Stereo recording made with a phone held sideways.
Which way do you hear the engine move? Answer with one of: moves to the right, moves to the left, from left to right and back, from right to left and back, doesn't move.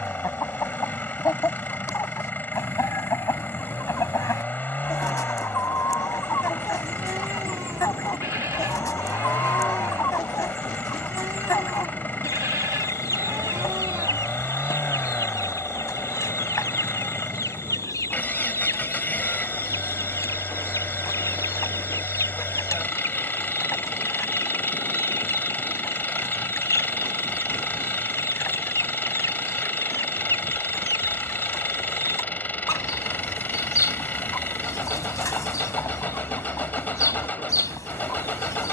doesn't move.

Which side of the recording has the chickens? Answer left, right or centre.
left.